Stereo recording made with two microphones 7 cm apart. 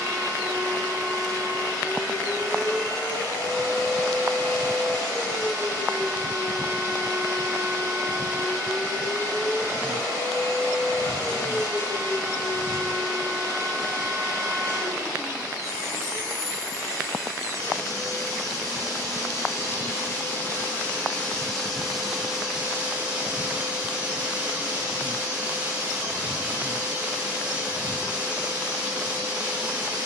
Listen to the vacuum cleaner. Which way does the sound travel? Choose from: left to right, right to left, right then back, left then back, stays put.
left to right.